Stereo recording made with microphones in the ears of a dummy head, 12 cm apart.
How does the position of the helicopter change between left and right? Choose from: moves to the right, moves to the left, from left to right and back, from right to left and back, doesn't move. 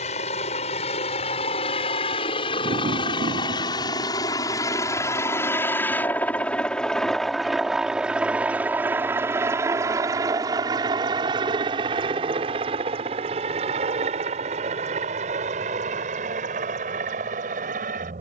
moves to the right.